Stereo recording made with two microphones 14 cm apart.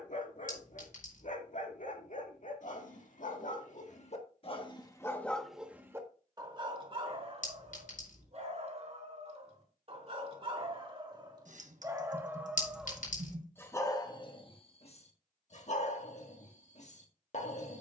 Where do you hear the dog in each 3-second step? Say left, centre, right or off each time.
left, left, right, right, centre, left.